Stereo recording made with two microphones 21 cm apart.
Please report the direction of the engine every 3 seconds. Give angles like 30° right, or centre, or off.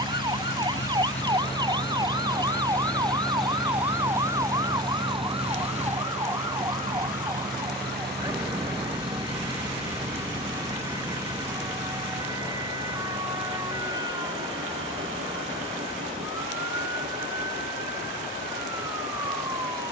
30° left, 10° right, 40° right, 60° right, 70° right, 70° right, 70° right.